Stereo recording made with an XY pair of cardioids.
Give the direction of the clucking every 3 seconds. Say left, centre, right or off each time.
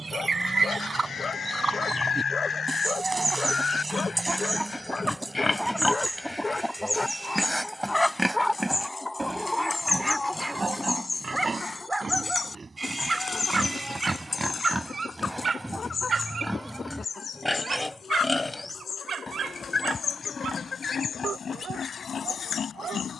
right, centre, centre, left, left, left, left, left.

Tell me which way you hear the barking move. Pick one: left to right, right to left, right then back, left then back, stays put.
left to right.